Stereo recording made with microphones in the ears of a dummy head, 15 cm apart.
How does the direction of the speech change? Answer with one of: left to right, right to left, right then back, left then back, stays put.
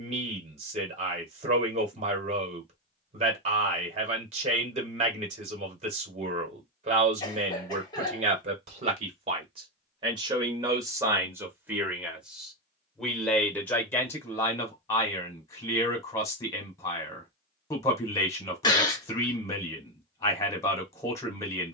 right to left.